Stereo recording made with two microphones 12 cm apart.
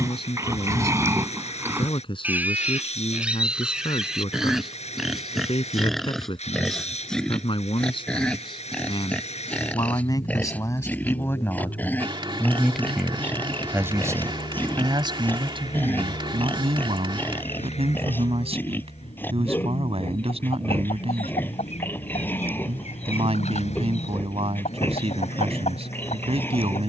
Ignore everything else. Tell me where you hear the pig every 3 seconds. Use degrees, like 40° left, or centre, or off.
20° right, centre, 10° left, 10° left, 20° left, 20° left, 20° left, 20° left, 20° left.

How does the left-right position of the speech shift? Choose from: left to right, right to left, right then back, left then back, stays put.
left to right.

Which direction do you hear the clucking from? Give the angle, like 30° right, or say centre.
70° left.